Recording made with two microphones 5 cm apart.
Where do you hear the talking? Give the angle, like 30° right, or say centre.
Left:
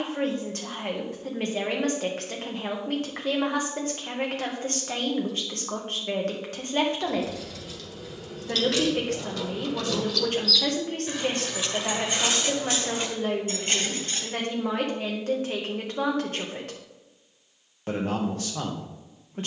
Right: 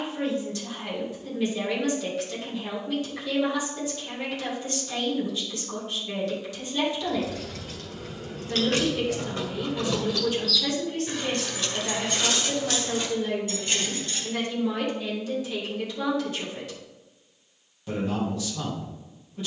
50° left.